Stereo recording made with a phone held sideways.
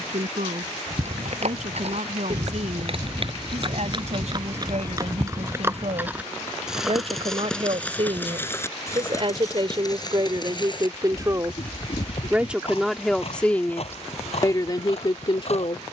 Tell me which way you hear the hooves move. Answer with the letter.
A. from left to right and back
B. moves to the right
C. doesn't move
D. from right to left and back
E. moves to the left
E.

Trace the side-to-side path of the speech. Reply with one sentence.
In this clip you hear the speech travel towards the left.